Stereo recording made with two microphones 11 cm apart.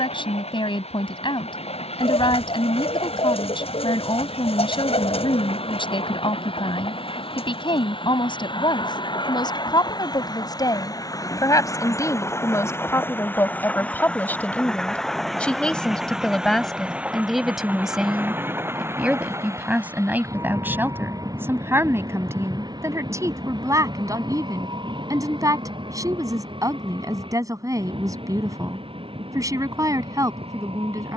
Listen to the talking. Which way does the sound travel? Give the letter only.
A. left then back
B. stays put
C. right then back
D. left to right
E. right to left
D.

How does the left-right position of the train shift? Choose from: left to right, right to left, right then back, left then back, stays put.
left to right.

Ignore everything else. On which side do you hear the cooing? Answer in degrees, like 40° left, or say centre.
60° left.